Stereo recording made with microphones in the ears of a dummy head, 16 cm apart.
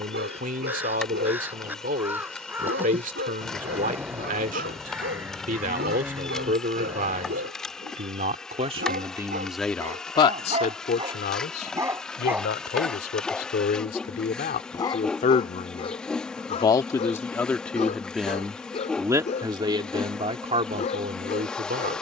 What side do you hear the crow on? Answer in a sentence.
You can hear the crow in the centre.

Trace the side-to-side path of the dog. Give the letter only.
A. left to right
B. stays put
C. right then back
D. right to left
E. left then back
D.